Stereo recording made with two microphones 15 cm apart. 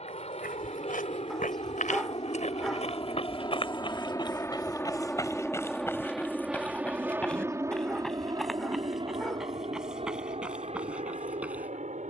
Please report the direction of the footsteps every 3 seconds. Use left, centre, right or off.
left, left, centre, centre.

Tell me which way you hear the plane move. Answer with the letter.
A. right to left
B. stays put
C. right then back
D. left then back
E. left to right
E.